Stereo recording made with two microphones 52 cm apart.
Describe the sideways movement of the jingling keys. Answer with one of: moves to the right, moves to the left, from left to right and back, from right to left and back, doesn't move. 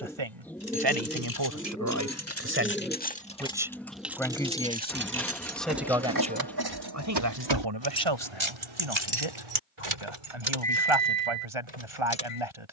moves to the right.